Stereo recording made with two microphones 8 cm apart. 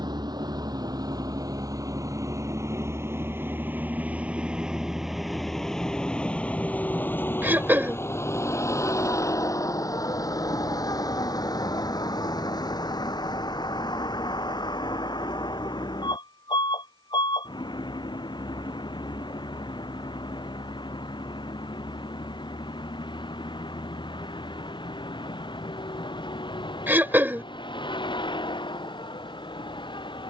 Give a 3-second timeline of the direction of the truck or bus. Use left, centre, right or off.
right, centre, left, left, left, left, left, left, left, left.